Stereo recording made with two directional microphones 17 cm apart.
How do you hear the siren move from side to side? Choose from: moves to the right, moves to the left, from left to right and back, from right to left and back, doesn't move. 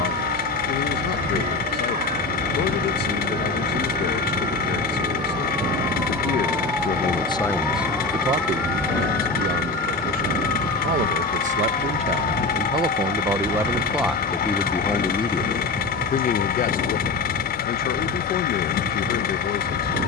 moves to the left.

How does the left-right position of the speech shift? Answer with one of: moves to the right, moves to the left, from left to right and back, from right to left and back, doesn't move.
from left to right and back.